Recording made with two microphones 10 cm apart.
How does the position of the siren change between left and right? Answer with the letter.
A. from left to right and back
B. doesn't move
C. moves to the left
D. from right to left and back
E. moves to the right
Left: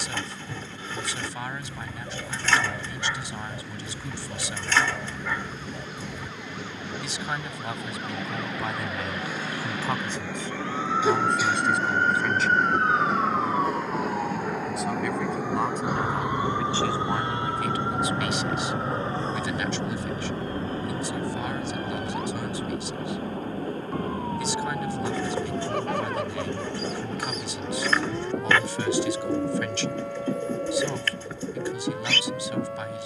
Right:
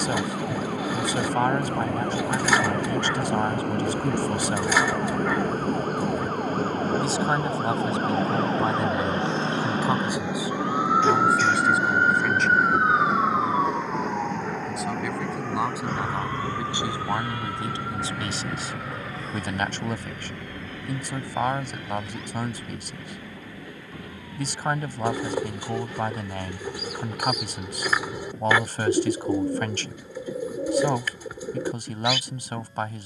C.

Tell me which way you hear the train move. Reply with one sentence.
In this clip you hear the train move from right to left.